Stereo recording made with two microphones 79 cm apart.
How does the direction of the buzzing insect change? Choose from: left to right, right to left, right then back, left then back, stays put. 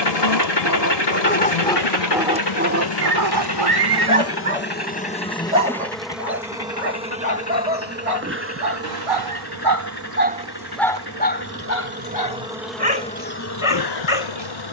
right then back.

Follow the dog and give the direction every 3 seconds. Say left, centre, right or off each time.
centre, right, right, centre, left.